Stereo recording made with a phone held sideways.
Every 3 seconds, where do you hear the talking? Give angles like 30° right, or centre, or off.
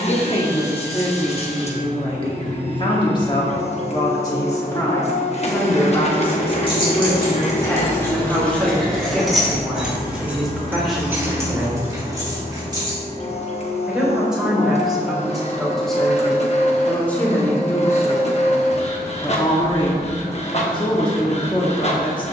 30° left, 20° left, 10° left, centre, centre, 10° left, 30° left, 30° left.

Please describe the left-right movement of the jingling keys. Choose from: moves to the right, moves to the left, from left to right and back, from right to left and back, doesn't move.
moves to the right.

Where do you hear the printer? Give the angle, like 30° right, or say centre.
40° left.